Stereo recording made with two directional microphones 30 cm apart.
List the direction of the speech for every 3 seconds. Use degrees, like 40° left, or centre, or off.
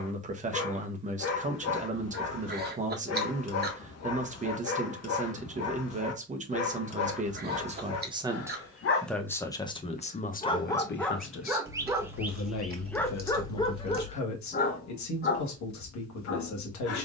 20° right, 20° right, 20° right, 30° left, 60° left, 70° left.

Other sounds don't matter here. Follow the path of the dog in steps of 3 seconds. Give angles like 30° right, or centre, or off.
50° left, 50° left, 50° left, 10° left, 10° left, 40° left.